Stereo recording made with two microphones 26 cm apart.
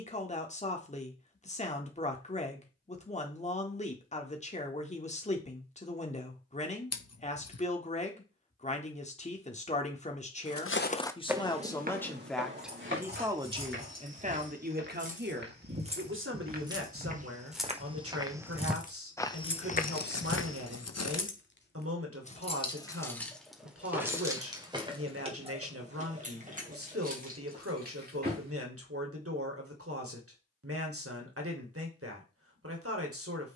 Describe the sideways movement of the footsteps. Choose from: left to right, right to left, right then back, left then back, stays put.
right then back.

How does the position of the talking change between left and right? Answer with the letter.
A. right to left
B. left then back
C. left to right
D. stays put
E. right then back
C.